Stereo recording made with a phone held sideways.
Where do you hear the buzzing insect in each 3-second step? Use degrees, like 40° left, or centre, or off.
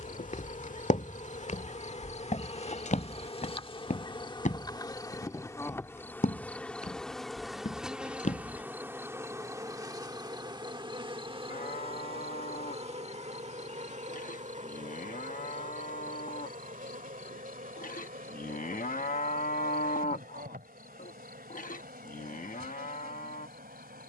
40° left, 30° left, centre, 30° right, 40° right, 50° right, 60° right, 70° right.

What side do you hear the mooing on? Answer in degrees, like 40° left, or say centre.
50° left.